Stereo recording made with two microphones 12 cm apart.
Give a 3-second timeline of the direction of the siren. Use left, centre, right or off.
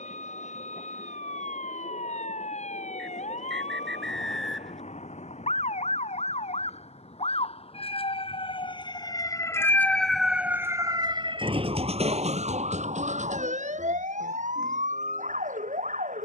left, left, left, centre, right, right.